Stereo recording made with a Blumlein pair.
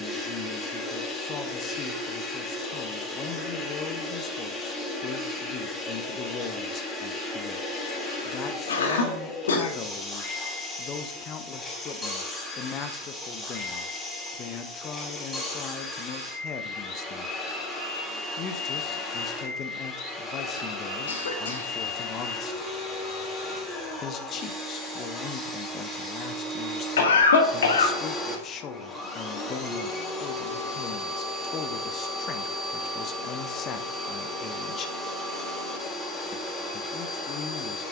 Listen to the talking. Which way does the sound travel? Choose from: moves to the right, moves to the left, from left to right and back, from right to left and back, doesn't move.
doesn't move.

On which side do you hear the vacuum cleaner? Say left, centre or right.
centre.